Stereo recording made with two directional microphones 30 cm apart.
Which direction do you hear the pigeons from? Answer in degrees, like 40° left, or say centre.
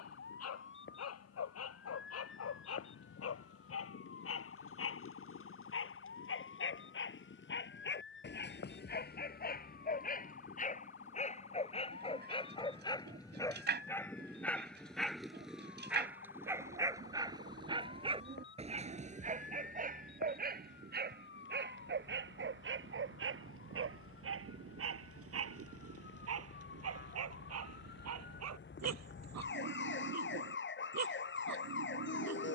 30° right.